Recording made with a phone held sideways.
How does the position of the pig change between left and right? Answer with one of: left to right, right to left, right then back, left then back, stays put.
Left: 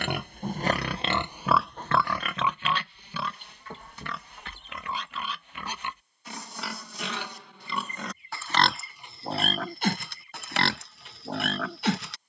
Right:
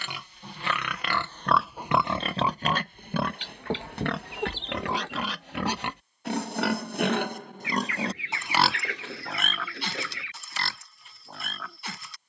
right then back.